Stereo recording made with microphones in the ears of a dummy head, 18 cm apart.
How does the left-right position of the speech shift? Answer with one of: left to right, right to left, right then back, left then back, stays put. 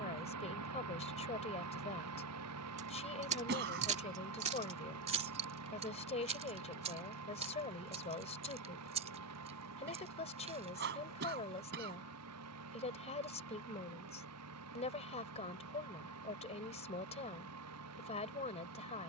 stays put.